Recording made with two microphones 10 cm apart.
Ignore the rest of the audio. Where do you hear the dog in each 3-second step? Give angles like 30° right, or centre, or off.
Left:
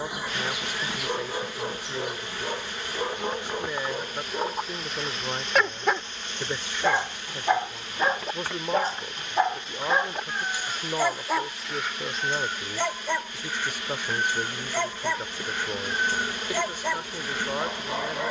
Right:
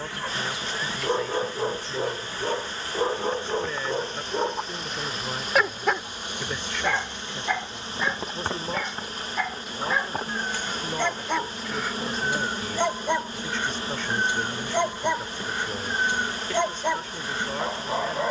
20° right, 20° right, 30° left, 10° left, 20° right, 20° right.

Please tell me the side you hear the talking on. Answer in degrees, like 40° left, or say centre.
10° left.